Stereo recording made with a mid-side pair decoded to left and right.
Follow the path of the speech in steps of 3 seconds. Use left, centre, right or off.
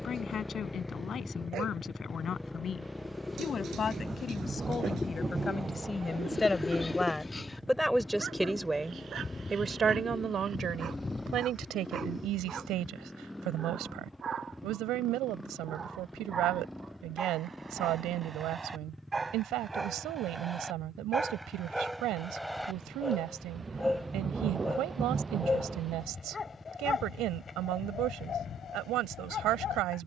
left, left, centre, right, right, right, right, right, right, right.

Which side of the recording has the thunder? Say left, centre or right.
right.